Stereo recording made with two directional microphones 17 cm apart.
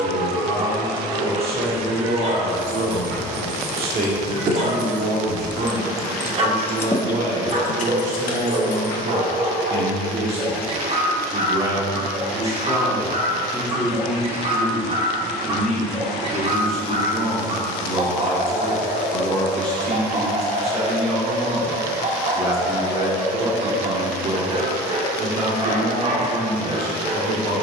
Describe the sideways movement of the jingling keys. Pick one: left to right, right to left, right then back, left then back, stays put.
right to left.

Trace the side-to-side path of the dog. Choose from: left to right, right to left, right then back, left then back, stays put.
stays put.